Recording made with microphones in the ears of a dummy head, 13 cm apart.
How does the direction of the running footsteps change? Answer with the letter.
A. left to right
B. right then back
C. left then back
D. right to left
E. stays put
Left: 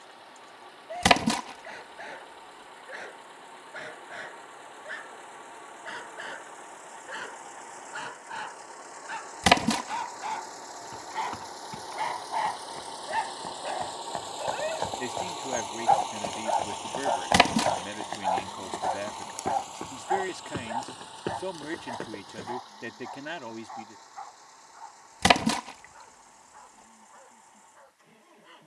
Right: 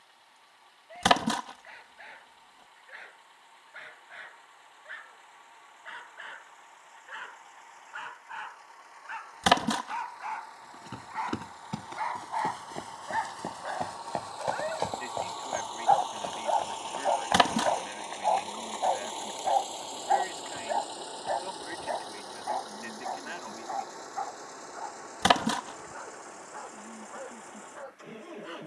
D.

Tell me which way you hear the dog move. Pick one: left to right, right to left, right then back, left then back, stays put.
left to right.